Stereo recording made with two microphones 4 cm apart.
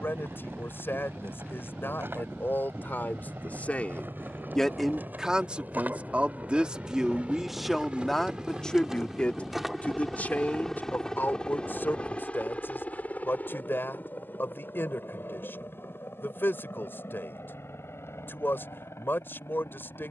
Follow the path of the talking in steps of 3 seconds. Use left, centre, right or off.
left, centre, centre, left, left, left, left.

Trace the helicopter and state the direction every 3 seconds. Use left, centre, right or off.
right, right, right, centre, left, left, left.